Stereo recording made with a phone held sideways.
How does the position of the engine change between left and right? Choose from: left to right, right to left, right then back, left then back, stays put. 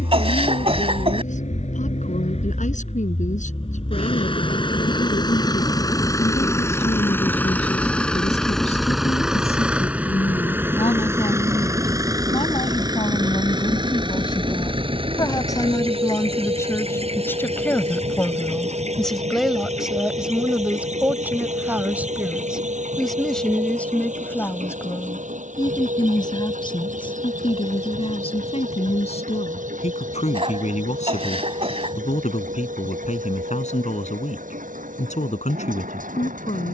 left to right.